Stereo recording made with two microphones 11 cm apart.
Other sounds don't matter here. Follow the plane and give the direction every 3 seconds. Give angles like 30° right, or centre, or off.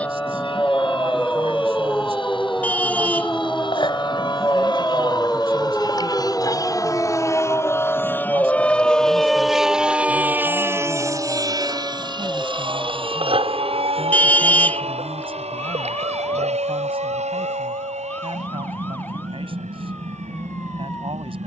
60° left, 50° left, 30° left, 20° right, 50° right, 70° right, 80° right.